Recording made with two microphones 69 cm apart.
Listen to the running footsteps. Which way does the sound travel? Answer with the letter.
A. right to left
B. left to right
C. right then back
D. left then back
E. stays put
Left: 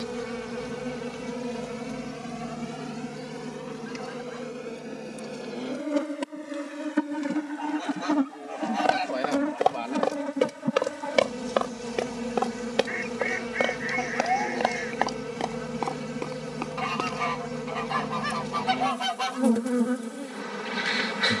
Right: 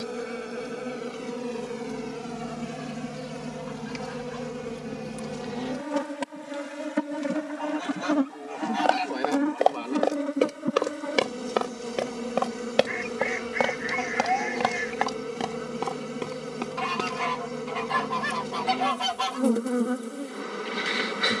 B.